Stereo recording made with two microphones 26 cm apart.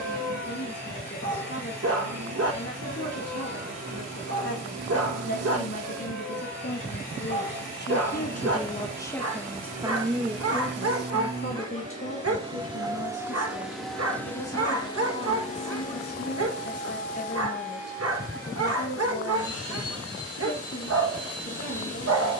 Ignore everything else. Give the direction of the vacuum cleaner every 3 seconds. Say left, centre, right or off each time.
right, right, right, right, centre, left, left, left.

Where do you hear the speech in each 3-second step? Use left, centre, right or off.
left, left, left, centre, left, left, left, left.